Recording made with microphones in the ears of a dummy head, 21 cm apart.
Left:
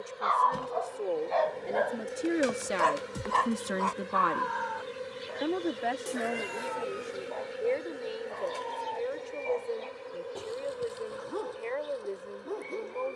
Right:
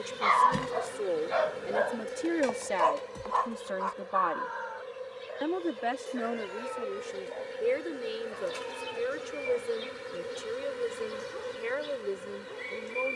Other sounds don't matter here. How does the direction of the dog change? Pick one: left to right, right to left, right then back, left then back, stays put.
right to left.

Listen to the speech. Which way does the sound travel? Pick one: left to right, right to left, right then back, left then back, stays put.
left then back.